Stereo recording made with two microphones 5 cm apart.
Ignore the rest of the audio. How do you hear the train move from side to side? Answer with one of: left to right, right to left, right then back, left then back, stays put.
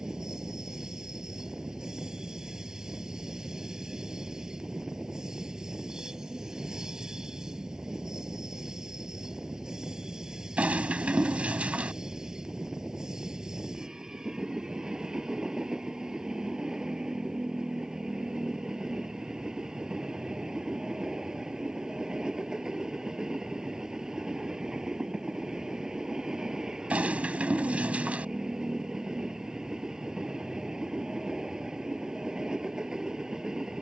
stays put.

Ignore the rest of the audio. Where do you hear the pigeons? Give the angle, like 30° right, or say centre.
30° right.